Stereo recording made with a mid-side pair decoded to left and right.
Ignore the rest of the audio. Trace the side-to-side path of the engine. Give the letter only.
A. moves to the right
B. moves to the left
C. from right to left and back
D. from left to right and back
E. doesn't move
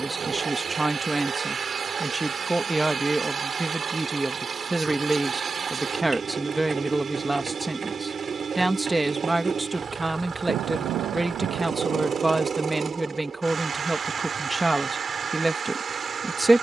E.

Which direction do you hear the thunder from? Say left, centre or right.
right.